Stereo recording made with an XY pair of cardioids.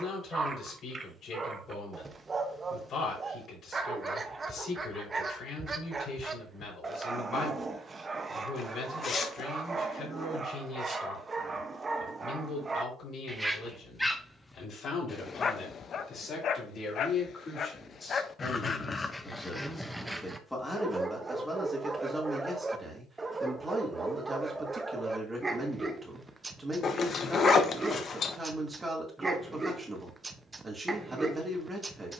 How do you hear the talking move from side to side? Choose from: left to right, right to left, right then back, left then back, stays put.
left to right.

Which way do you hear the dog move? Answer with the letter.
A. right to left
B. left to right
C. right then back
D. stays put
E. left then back
E.